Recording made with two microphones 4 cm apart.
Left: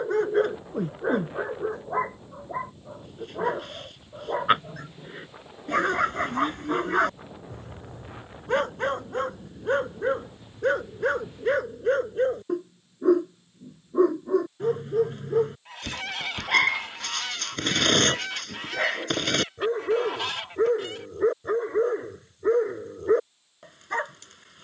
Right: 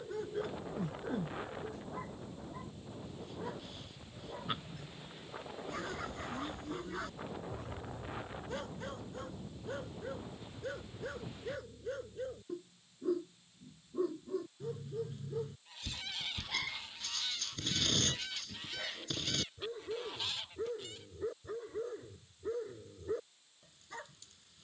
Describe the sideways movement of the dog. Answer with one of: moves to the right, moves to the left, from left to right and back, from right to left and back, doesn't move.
doesn't move.